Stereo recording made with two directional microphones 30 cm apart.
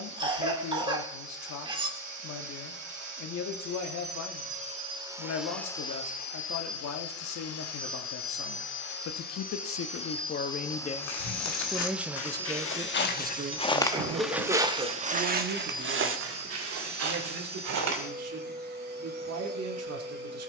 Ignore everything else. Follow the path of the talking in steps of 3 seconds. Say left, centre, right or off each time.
left, left, left, left, right, right, right.